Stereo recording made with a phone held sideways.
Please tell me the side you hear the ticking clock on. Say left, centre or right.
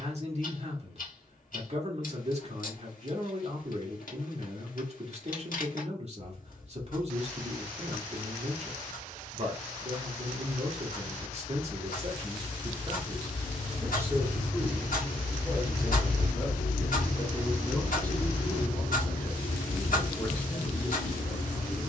left.